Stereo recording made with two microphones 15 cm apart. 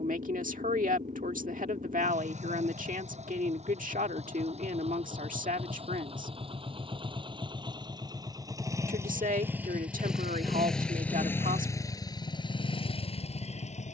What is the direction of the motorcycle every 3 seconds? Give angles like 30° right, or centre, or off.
50° right, 50° right, 30° right, centre, 40° left.